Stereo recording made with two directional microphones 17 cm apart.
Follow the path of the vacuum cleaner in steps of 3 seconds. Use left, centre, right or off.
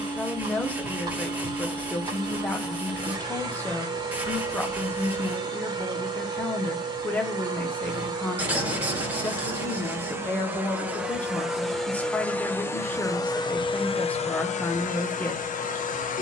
right, right, right, centre, left, left.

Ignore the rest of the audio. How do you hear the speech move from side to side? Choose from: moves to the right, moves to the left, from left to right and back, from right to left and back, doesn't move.
doesn't move.